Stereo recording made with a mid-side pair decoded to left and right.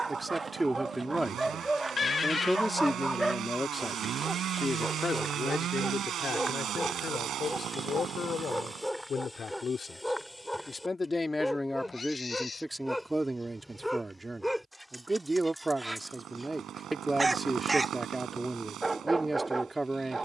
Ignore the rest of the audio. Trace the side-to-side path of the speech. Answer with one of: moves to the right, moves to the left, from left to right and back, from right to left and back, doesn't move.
from right to left and back.